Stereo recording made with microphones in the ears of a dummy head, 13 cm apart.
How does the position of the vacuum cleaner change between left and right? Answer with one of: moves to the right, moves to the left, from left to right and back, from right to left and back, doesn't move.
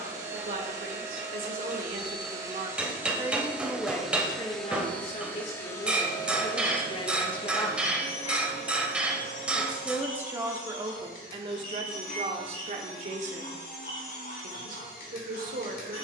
moves to the left.